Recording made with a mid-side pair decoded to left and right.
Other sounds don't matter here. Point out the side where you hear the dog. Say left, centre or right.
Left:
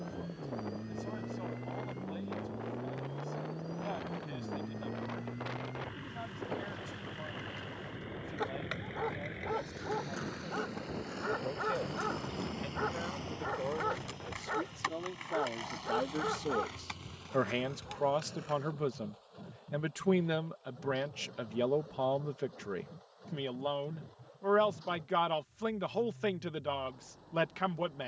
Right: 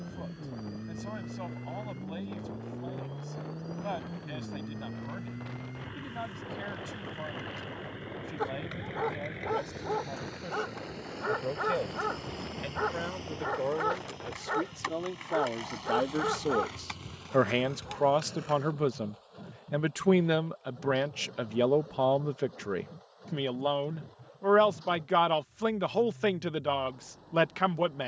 right.